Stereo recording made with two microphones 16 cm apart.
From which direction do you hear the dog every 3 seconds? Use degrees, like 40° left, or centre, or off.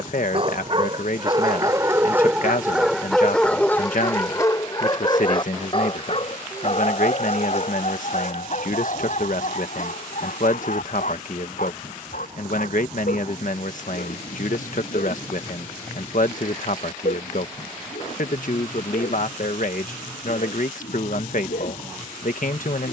20° right, 20° left, 50° left, 60° left, 70° left, 70° left, 70° left, 70° left.